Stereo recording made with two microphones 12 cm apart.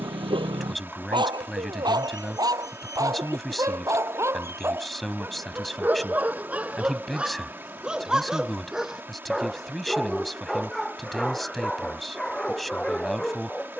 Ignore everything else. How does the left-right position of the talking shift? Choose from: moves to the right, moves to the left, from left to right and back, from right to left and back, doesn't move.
doesn't move.